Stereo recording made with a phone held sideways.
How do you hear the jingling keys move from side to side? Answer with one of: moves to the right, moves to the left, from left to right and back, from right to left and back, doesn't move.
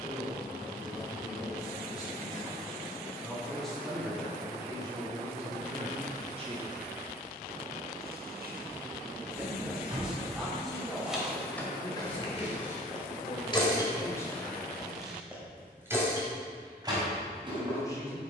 from right to left and back.